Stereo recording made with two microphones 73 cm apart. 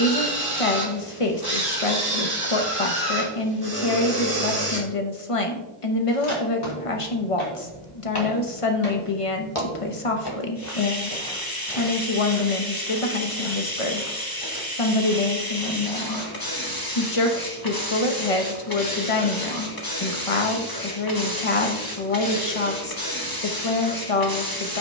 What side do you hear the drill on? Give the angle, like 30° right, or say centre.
30° right.